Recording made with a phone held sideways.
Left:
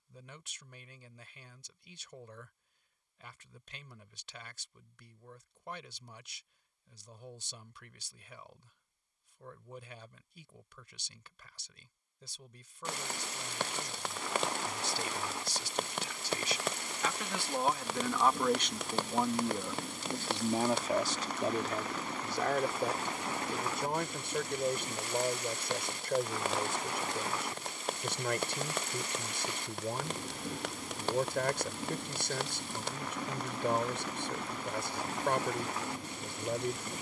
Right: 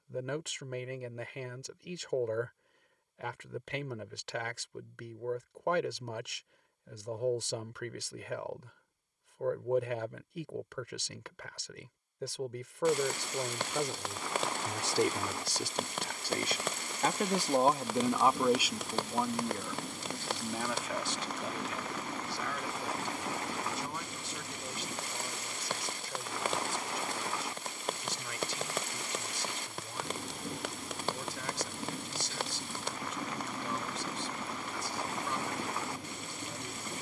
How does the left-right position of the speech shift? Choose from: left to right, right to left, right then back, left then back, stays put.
right to left.